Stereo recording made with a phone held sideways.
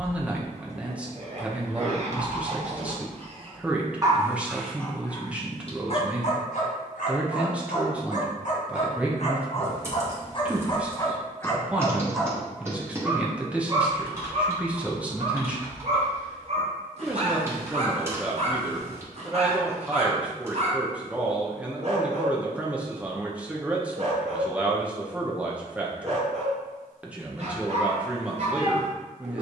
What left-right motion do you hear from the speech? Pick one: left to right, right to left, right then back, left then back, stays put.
stays put.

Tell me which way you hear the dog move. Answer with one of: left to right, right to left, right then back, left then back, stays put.
left then back.